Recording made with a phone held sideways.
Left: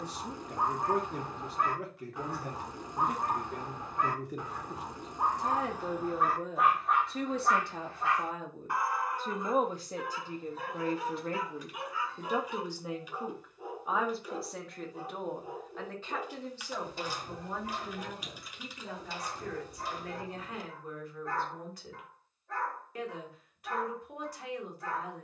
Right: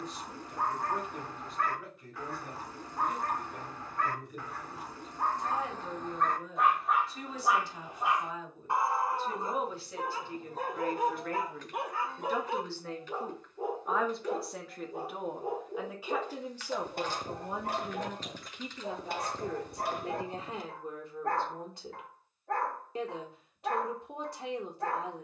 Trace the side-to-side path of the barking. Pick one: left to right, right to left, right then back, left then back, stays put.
left to right.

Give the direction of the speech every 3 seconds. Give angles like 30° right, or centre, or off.
80° left, 80° left, 60° left, 40° left, 10° left, 10° right, 20° right, 30° right, 30° right.